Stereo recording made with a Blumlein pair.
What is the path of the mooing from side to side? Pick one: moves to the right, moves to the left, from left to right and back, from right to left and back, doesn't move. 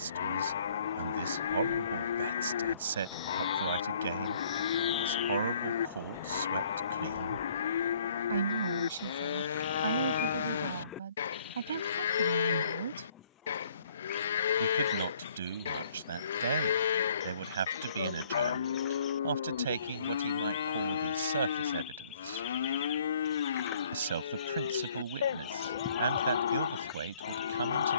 doesn't move.